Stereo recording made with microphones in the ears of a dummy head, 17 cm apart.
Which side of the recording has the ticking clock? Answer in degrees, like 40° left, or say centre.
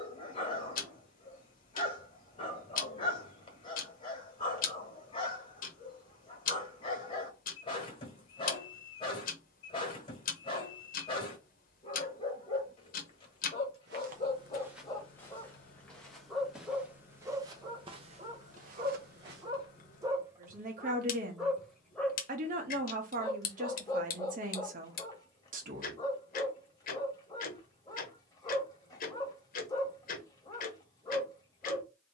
50° left.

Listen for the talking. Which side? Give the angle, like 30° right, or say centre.
50° right.